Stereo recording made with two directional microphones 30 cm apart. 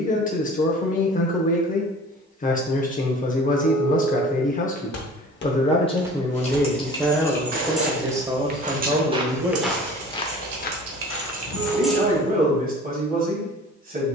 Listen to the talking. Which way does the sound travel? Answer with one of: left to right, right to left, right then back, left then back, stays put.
left to right.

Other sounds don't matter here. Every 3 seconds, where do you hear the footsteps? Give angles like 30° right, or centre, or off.
off, 40° left, 30° right, 20° left, off.